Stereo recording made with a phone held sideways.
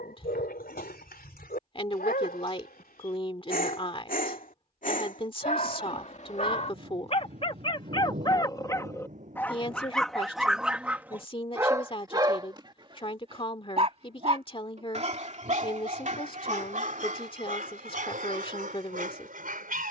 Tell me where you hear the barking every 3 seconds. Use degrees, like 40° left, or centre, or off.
70° left, 60° left, 30° left, centre, 30° right, 50° right, 60° right.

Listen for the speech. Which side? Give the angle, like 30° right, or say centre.
30° left.